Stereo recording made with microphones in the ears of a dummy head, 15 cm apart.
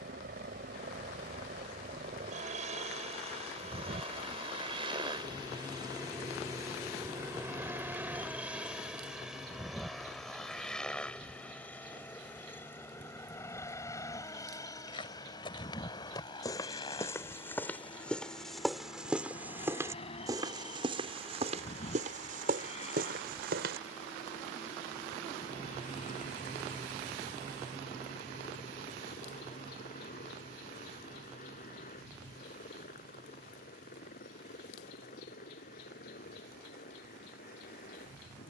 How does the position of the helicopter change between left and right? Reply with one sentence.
In this clip you hear the helicopter move to the left.